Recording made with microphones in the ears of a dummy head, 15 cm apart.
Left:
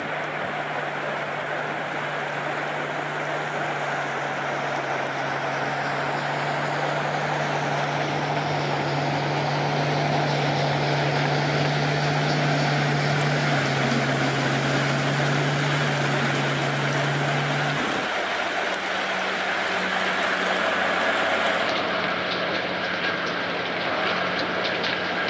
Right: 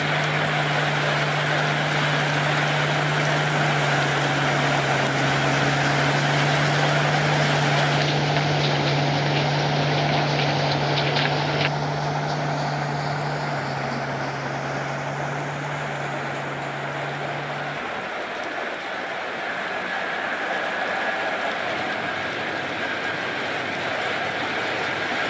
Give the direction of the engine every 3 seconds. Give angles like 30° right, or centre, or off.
60° right, 40° right, 20° right, 10° left, 40° left, 50° left, 60° left, 70° left, 70° left.